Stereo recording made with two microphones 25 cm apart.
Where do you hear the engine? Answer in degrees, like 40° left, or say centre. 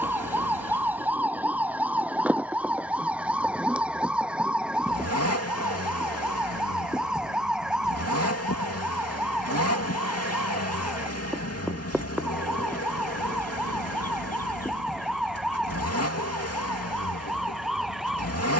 80° left.